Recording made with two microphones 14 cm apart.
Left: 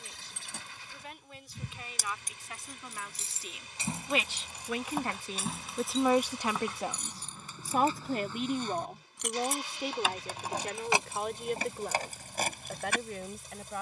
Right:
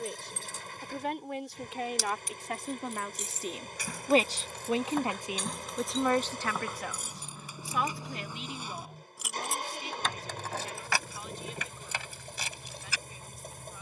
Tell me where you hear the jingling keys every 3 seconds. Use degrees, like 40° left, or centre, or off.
50° left, 20° left, 10° right, 20° left, 50° left.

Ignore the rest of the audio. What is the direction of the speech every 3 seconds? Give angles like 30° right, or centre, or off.
70° right, 30° right, 40° left, 60° left, 70° left.